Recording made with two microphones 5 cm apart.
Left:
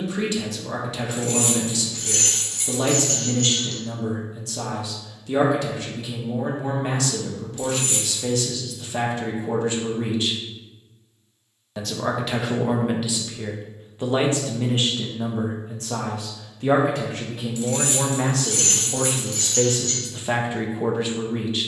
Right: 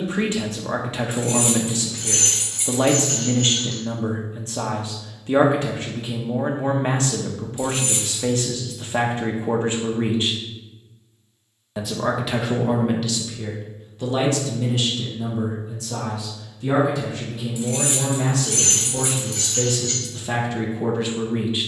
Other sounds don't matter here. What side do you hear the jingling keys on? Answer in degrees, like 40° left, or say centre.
20° right.